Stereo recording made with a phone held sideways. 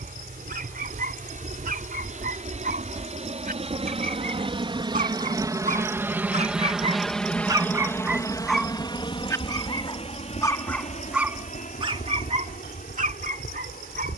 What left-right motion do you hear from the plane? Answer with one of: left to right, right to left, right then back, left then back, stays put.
right to left.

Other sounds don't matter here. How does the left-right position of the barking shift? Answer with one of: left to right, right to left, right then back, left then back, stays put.
left then back.